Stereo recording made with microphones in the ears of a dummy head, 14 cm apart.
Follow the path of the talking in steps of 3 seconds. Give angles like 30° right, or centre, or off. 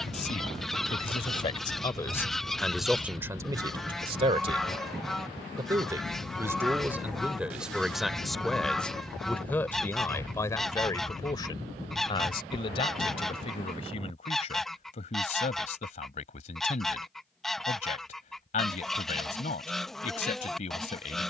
30° left, 30° right, 10° right, 20° left, 40° left, 40° left, 50° left.